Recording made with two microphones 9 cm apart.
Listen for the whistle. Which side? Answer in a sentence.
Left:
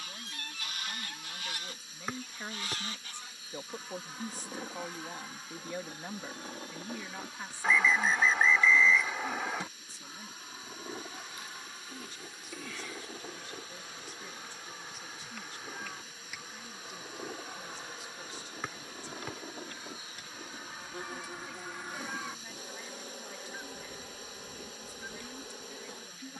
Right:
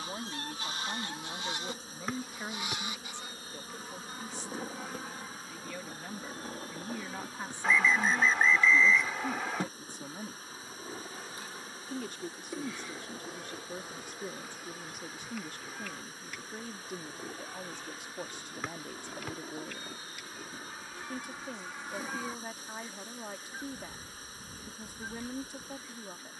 In this clip you hear the whistle in the centre.